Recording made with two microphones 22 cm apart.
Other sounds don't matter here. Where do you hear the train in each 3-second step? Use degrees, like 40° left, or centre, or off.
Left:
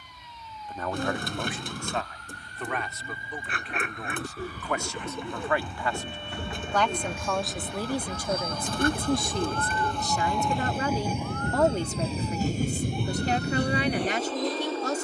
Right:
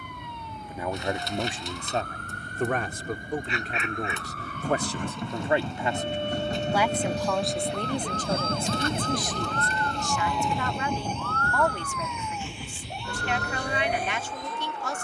50° right, 50° right, 30° right, centre, 50° left.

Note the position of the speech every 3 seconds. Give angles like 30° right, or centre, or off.
30° right, 30° right, centre, 30° left, 40° left.